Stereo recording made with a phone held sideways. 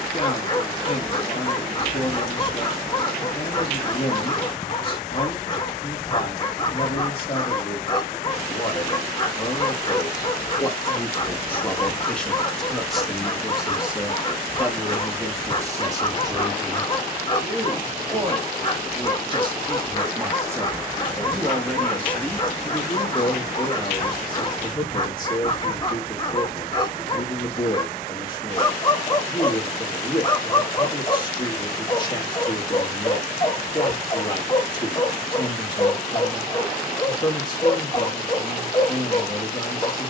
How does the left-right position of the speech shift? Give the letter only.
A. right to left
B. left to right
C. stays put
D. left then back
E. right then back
E.